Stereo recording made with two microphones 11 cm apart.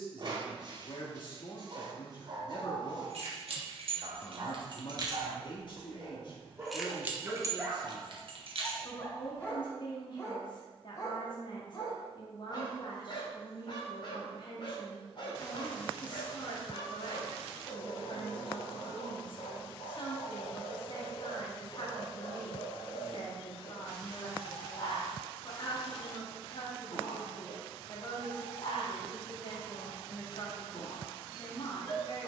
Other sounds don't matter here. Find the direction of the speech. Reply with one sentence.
In this clip you hear the speech on the left.